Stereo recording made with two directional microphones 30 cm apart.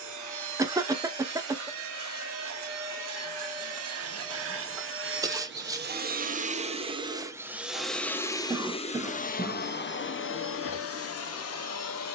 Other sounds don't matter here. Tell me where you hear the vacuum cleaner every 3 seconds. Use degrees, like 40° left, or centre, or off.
60° right, 40° right, 10° right, 40° left.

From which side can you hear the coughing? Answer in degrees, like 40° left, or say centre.
10° right.